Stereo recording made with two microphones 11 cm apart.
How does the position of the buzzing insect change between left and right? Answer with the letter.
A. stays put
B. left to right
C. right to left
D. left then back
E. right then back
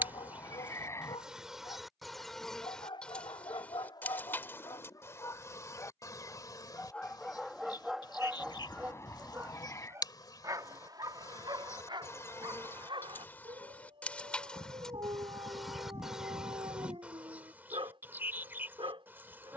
D.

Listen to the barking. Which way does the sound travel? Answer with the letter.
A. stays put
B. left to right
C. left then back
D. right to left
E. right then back
B.